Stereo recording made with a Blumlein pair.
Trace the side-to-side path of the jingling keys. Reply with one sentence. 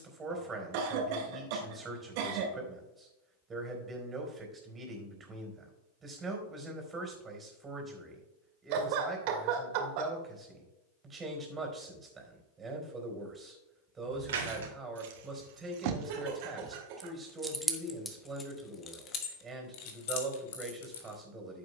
In this clip you hear the jingling keys move to the left.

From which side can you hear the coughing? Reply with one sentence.
In this clip you hear the coughing on the right.